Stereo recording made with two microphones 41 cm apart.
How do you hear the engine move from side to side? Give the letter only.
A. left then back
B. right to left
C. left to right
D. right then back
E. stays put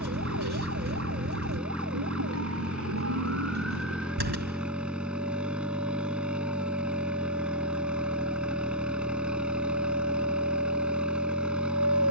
E.